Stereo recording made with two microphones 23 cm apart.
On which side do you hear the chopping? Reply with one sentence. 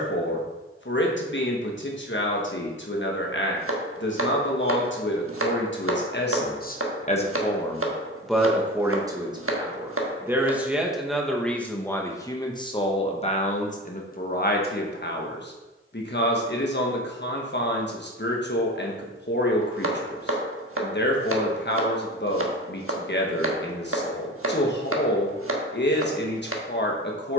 You can hear the chopping on the right.